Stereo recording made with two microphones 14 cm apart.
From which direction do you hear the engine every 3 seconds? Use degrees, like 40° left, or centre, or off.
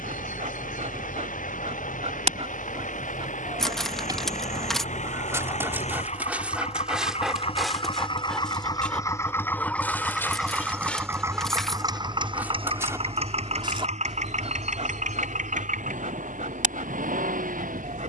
70° left, 60° left, 40° left, centre, 50° right, 70° right.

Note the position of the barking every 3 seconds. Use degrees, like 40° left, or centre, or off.
60° right, 30° right, centre, 10° left, 30° right, 60° right.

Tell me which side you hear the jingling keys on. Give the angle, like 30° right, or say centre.
centre.